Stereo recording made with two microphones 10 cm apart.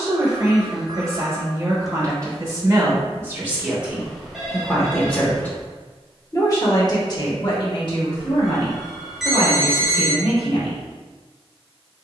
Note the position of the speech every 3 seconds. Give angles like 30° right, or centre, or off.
30° right, centre, 50° left, 70° left.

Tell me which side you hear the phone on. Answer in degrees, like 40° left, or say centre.
centre.